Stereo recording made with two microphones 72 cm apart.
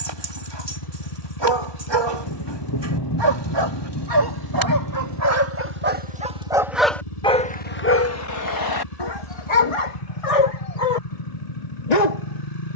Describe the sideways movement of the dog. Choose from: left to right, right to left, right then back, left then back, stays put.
right to left.